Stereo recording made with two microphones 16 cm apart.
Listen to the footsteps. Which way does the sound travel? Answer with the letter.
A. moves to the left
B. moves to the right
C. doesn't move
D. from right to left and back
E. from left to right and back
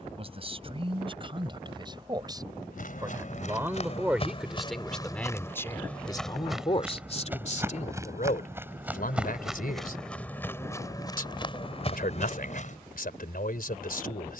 E.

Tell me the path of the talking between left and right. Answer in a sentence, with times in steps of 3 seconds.
In this clip you hear the talking on the right from 0 s, in the centre from 3 s and on the left from 6 s.